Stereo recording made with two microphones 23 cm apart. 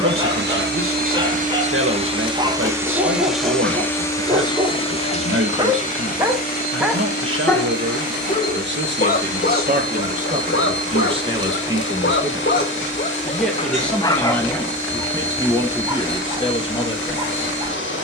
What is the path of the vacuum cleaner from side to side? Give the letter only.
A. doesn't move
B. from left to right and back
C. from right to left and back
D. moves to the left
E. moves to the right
D.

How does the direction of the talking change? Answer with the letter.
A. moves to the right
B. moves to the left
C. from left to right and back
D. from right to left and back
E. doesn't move
B.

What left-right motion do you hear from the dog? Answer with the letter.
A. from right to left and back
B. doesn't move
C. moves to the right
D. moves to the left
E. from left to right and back
A.